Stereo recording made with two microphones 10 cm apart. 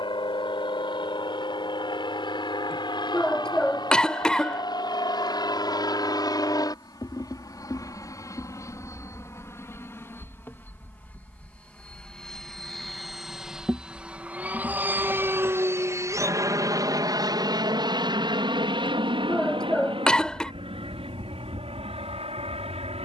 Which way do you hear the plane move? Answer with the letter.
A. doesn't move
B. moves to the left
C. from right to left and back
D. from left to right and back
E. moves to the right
E.